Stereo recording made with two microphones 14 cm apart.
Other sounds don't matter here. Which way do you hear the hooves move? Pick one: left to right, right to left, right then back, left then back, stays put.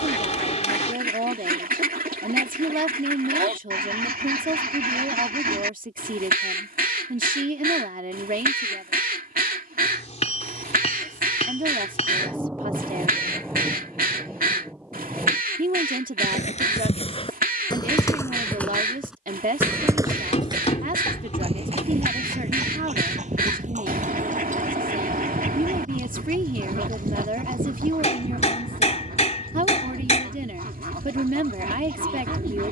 left to right.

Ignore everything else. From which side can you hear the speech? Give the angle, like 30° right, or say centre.
70° right.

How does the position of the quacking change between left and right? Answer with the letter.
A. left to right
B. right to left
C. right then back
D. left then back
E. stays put
E.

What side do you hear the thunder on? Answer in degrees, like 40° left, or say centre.
10° right.